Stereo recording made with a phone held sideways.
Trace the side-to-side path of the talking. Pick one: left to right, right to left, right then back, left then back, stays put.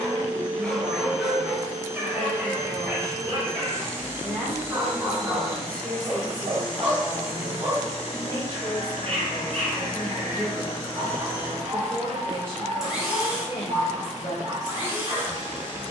right to left.